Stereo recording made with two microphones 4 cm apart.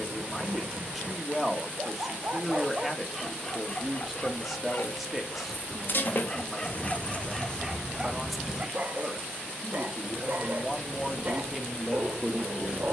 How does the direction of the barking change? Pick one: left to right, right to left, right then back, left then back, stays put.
left then back.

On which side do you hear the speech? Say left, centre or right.
centre.